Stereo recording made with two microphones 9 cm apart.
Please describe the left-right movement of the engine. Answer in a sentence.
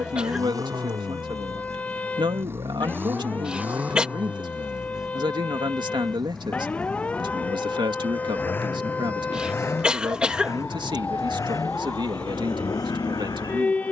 You can hear the engine go from the right side to the left.